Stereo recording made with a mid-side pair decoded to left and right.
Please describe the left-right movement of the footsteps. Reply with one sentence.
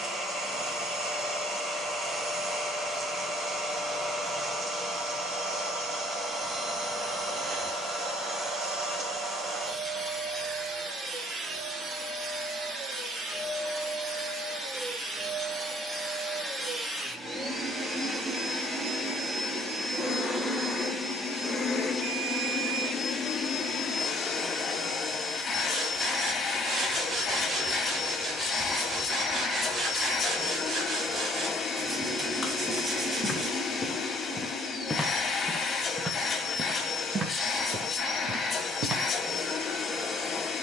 You can hear the footsteps move from left to right.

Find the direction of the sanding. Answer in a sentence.
You can hear the sanding on the right.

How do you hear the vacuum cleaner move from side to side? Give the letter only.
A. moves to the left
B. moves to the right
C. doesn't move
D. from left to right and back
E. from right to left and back
A.